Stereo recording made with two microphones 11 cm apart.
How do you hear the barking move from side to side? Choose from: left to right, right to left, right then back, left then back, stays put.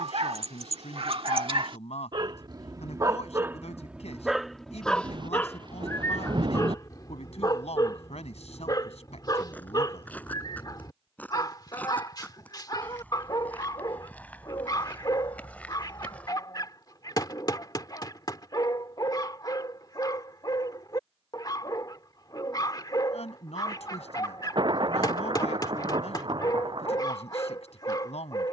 right to left.